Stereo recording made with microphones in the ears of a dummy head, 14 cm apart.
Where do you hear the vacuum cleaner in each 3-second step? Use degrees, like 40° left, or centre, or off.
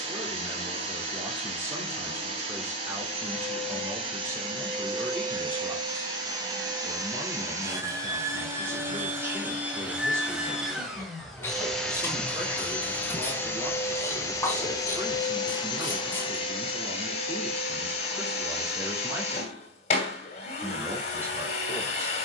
40° right, 30° right, 20° right, 10° right, 10° left, 30° left, 40° left, 40° left.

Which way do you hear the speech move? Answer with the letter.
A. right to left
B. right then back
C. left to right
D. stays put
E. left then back
D.